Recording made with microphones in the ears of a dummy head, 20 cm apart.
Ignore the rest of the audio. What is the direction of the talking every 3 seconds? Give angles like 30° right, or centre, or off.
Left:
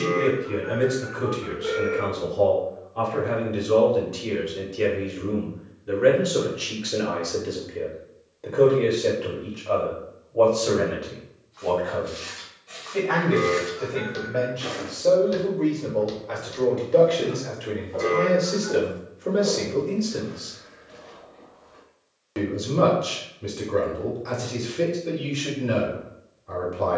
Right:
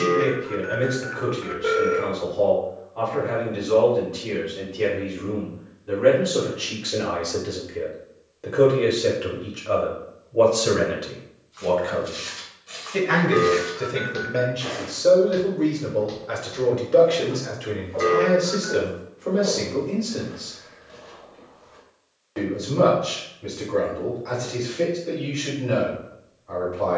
50° left, 40° left, 10° left, 30° right, 40° right, 10° right, 20° left, 50° left, 50° left.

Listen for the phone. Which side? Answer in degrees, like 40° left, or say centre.
60° right.